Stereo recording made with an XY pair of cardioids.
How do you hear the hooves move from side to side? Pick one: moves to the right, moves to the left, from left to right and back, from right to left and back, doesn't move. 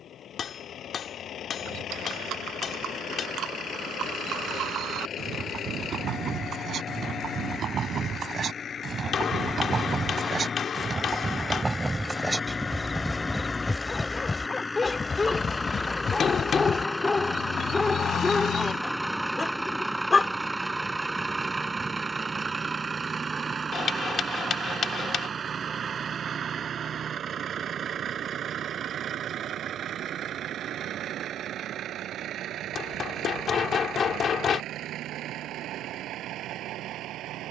moves to the left.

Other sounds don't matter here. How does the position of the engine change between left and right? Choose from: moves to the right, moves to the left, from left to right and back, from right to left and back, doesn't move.
moves to the right.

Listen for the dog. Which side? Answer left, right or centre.
left.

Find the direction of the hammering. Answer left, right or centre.
left.